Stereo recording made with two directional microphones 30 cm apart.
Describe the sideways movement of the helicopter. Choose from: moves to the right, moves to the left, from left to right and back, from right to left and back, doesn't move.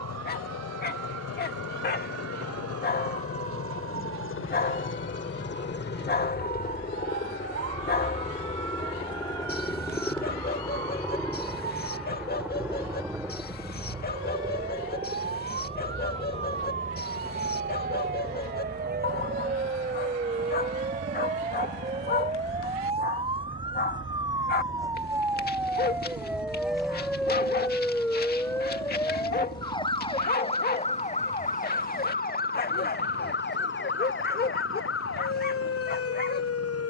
moves to the right.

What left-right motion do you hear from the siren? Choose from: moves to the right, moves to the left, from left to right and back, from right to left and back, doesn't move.
moves to the left.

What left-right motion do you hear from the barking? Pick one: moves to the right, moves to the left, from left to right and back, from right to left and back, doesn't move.
doesn't move.